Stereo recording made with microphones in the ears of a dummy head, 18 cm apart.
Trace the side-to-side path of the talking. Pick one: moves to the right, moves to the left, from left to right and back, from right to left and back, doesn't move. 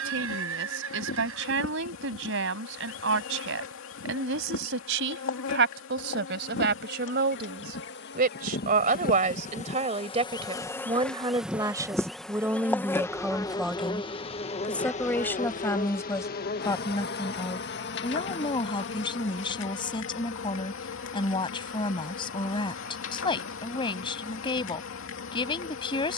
moves to the left.